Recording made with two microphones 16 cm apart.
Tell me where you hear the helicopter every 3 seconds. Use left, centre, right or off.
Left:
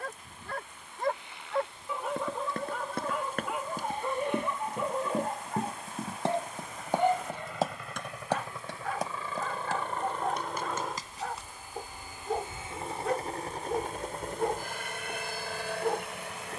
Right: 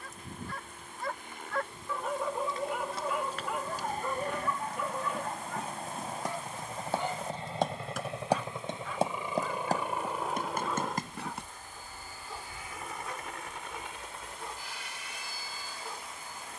right, right, right, centre, left, left.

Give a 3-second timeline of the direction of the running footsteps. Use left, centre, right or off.
left, left, centre, right, off, off.